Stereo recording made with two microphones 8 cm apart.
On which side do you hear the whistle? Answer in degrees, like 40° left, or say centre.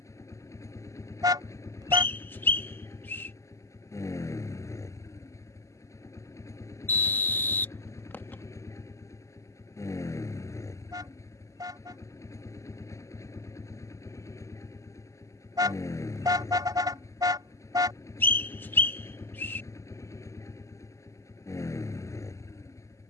30° left.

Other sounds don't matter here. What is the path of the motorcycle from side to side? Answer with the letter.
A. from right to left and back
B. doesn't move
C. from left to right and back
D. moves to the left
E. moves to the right
B.